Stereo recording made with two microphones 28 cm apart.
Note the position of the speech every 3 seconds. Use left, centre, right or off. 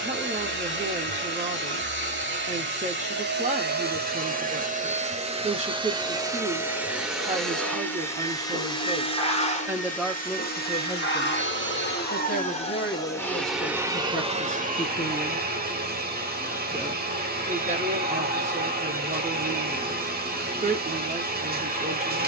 right, right, right, centre, left, centre, right, right.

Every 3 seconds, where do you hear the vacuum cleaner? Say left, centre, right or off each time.
right, right, centre, left, centre, right, right, right.